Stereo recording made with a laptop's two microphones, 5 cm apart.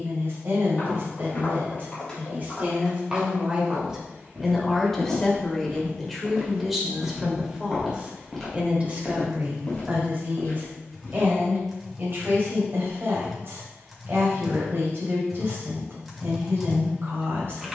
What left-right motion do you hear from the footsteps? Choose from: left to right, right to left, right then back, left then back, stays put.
right then back.